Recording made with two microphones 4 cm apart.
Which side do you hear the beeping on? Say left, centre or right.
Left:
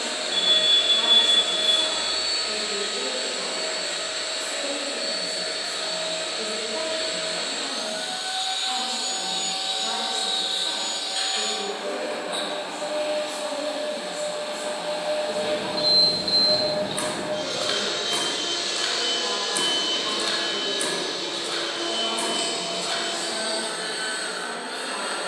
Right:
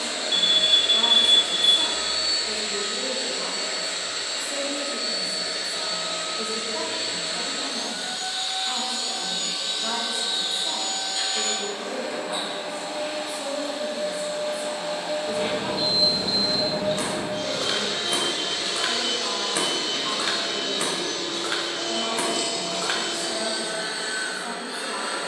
right.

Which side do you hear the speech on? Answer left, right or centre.
centre.